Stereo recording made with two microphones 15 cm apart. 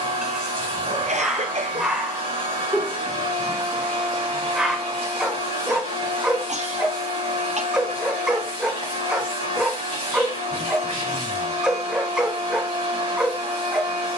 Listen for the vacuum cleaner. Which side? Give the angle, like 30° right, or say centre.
70° right.